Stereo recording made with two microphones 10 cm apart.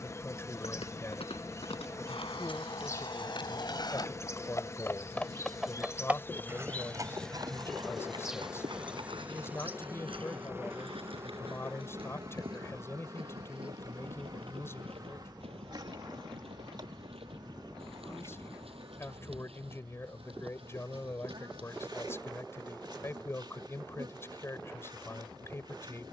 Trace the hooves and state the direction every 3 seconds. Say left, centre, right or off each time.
left, left, right, right, right, right, right, right, off.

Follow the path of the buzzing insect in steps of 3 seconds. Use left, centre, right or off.
left, left, centre, right, right, right, right, right, right.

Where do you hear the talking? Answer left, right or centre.
left.